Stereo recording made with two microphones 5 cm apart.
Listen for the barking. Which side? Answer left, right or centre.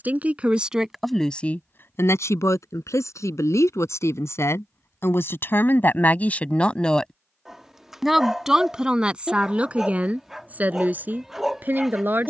centre.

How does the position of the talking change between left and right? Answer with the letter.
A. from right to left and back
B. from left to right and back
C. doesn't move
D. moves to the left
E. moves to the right
A.